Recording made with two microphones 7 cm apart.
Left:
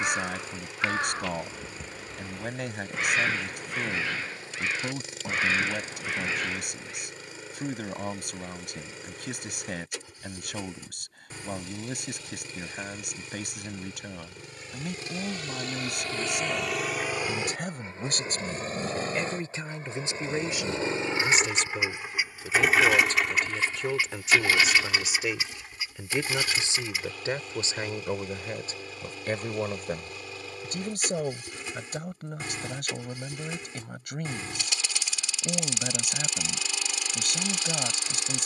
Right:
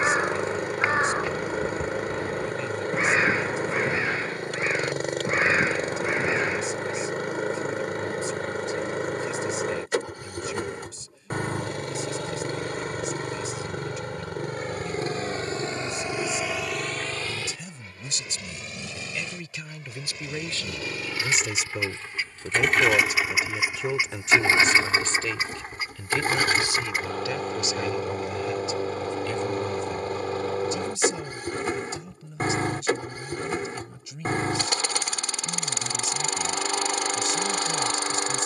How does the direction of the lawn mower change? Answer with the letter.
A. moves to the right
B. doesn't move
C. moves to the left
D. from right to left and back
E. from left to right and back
D.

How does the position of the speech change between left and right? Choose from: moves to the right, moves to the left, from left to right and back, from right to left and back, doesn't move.
from left to right and back.